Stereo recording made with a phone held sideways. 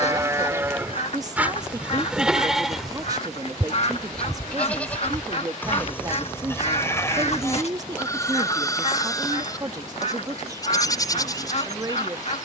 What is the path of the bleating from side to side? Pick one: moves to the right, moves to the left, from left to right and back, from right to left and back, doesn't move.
moves to the left.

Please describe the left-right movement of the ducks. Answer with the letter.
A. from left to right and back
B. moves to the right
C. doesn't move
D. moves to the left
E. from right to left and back
C.